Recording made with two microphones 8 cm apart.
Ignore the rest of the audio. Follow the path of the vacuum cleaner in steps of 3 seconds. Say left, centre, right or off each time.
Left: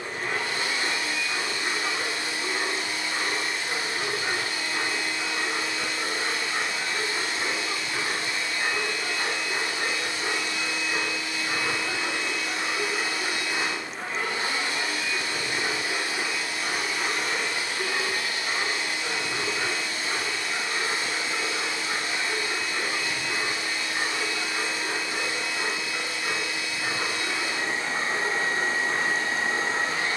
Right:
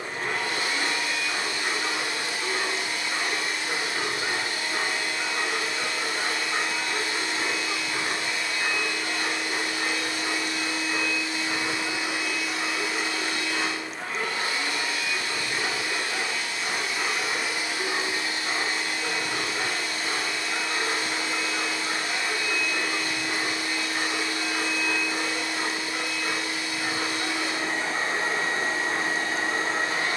right, right, right, right, centre, centre, right, right, right, right.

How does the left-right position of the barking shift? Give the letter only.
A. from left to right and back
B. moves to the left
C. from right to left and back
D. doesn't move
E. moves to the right
C.